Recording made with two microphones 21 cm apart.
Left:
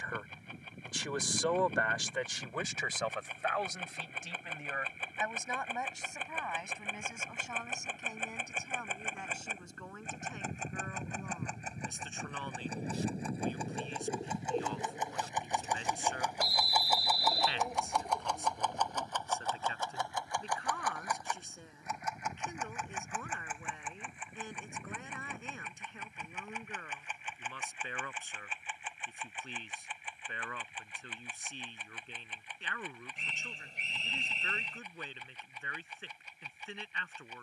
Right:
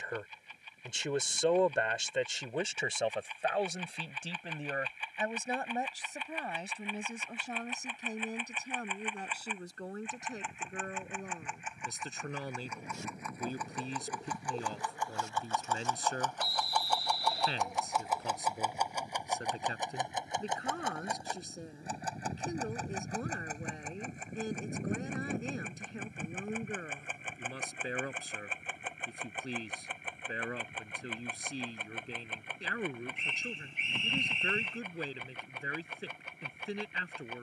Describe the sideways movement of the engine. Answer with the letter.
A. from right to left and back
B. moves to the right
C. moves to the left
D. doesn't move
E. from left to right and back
B.